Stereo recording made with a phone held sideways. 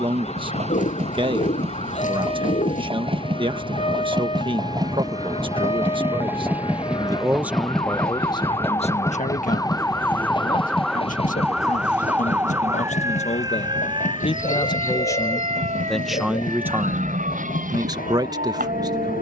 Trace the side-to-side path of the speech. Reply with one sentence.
You can hear the speech go left and come back.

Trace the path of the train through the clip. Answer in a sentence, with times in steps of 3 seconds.
In this clip you hear the train on the right from 0 s, in the centre from 6 s and on the left from 9 s.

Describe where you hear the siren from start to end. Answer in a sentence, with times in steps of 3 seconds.
In this clip you hear the siren on the left from 0 s, in the centre from 9 s and on the right from 12 s.